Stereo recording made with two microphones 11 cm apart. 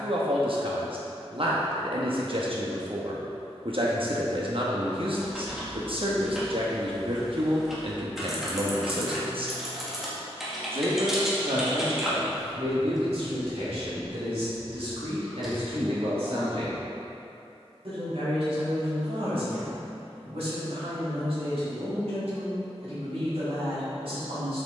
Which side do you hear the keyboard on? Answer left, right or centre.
centre.